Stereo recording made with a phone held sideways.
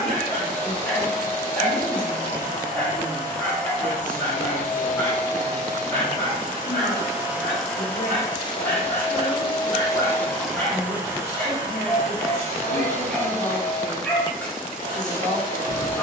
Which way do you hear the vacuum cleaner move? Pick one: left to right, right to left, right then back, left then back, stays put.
left then back.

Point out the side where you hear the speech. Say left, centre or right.
left.